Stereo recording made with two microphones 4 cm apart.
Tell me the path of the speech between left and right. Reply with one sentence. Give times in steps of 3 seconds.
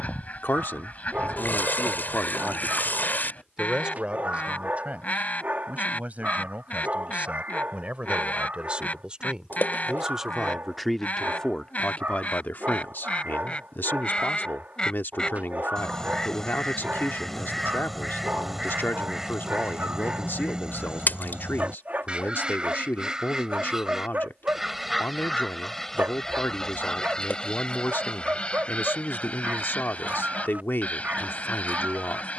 You can hear the speech on the left from 0 s, on the right from 3 s, in the centre from 9 s and on the left from 12 s.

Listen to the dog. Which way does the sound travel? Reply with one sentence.
You can hear the dog stay put.